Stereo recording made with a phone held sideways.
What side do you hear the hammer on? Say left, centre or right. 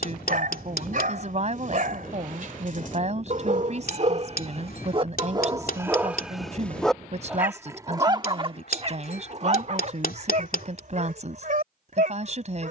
left.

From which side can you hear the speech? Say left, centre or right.
right.